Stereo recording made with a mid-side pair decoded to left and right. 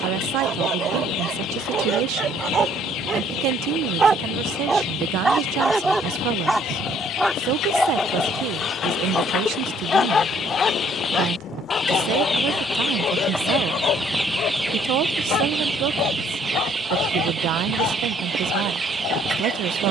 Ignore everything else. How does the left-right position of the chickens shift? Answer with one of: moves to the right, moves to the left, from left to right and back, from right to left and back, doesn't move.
moves to the right.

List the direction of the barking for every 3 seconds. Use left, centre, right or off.
right, right, centre, left, left, left, left.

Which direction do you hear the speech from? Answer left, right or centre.
right.